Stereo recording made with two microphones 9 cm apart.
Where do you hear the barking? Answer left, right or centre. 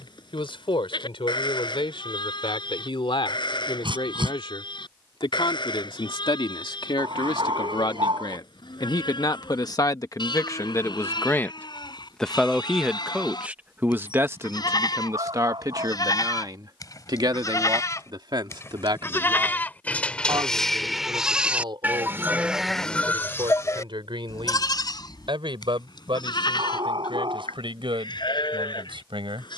right.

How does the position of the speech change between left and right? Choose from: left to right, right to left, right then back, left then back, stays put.
left to right.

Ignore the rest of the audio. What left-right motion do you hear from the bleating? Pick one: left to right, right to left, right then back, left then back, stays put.
right then back.